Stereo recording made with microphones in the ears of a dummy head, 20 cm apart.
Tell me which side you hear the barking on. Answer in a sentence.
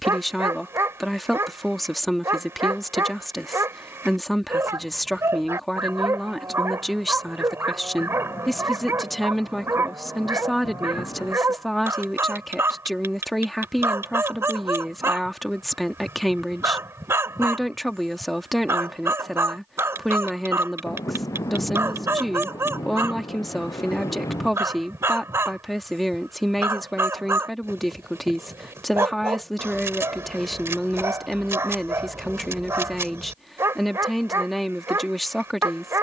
In this clip you hear the barking in the centre.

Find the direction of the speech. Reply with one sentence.
In this clip you hear the speech in the centre.